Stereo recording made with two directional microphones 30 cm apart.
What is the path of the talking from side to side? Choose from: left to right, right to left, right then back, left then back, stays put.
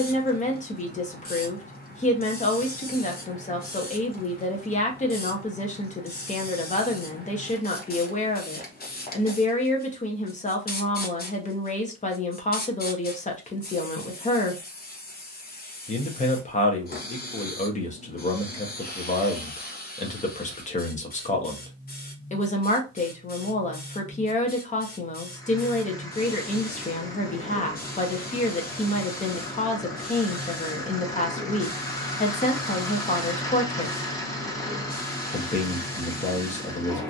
stays put.